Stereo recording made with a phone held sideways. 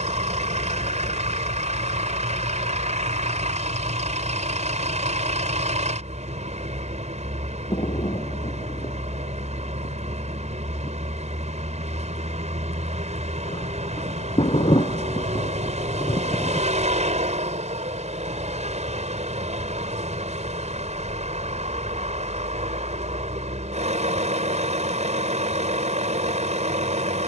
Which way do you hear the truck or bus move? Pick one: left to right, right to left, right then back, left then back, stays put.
stays put.